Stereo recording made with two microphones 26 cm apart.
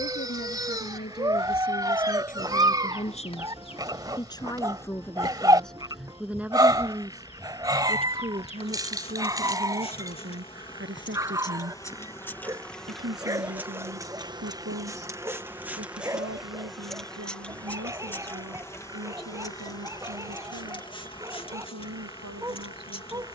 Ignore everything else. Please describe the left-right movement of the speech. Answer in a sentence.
In this clip you hear the speech move to the right.